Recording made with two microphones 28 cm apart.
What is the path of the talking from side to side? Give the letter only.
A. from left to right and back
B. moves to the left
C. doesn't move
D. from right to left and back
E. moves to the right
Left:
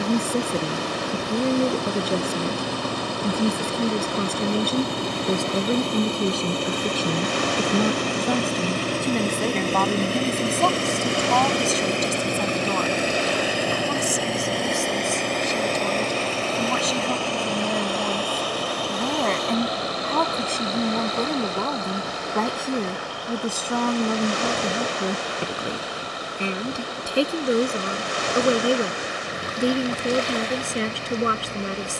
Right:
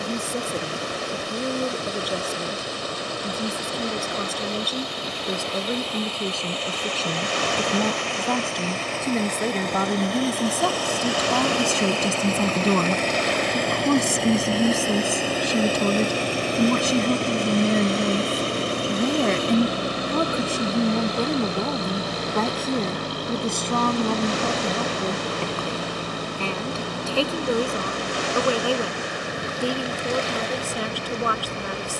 A.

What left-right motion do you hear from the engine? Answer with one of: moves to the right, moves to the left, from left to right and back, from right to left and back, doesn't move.
moves to the right.